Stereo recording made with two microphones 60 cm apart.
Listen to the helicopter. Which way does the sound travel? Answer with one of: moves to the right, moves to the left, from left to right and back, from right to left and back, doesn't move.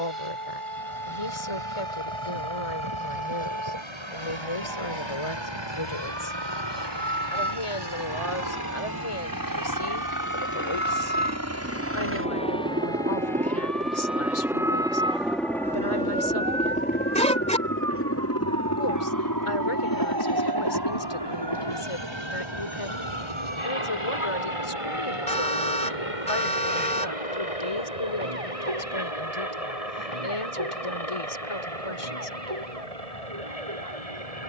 moves to the left.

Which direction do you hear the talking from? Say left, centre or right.
left.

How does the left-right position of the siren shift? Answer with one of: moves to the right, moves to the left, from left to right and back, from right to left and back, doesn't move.
moves to the right.